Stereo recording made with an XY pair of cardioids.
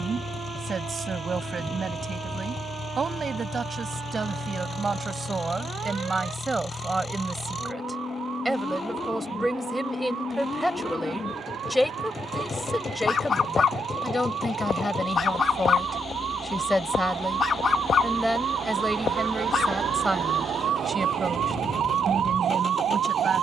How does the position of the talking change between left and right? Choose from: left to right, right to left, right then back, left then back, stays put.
left then back.